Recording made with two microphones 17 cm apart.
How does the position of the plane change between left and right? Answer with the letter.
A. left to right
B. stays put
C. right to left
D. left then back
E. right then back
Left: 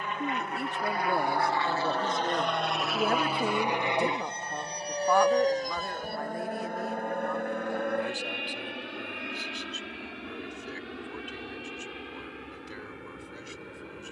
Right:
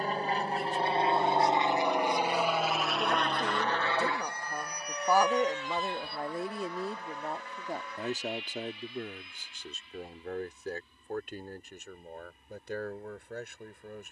C.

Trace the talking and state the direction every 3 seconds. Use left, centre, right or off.
left, centre, right, right, right.